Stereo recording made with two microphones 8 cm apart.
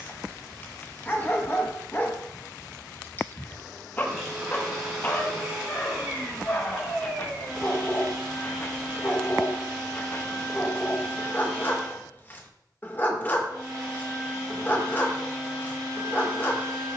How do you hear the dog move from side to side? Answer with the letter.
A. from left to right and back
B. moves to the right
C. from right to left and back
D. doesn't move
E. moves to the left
D.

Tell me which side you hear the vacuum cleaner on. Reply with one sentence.
You can hear the vacuum cleaner in the centre.